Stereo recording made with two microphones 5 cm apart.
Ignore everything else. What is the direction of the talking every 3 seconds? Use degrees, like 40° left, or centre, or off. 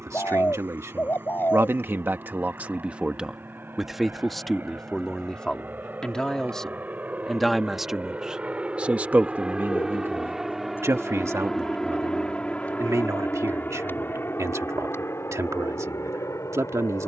50° right, centre, centre, 60° right, 80° right, 80° right.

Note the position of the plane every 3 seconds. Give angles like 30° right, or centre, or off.
50° right, 40° right, 30° right, centre, 40° left, 60° left.